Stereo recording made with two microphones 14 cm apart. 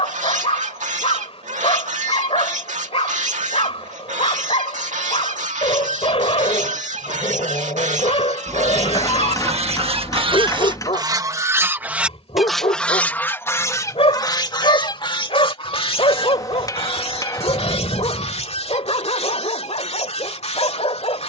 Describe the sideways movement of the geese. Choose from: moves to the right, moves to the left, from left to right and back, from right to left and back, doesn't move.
moves to the left.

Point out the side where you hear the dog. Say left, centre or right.
left.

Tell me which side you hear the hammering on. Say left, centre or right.
left.